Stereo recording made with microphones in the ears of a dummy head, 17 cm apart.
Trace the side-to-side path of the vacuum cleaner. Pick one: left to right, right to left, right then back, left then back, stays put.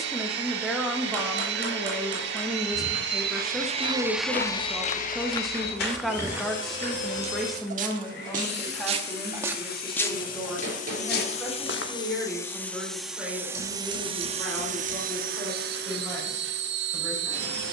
left then back.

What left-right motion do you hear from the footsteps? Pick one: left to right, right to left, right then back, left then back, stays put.
right then back.